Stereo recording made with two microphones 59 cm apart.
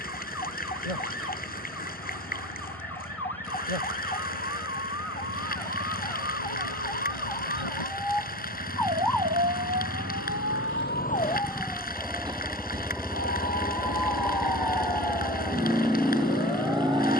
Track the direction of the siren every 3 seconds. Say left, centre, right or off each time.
left, left, left, left, right, right.